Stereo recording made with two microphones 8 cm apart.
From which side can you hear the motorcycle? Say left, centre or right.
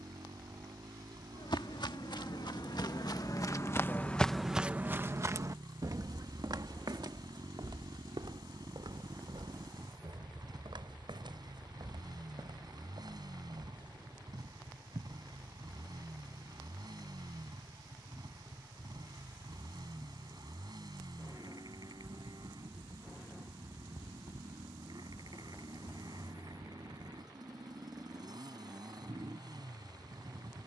right.